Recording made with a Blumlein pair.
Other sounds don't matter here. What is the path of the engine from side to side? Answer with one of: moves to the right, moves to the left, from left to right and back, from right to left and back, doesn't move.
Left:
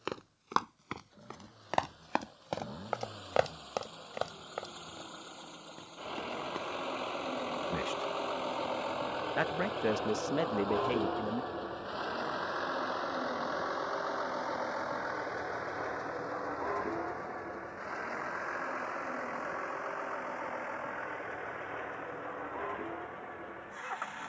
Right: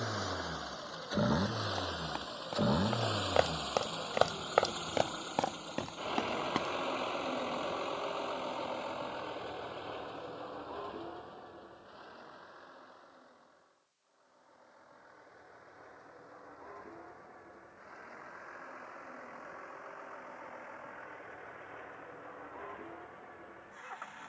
moves to the left.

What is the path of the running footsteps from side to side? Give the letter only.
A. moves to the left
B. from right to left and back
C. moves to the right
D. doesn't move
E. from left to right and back
C.